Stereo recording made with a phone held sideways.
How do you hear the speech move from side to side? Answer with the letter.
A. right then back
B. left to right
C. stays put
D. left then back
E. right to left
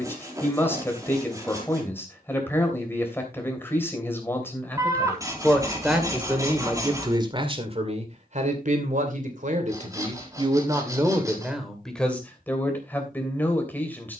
A.